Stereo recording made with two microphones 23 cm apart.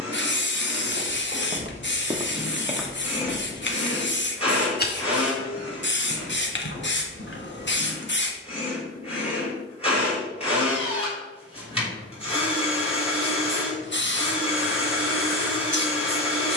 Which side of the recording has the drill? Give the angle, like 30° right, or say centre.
20° left.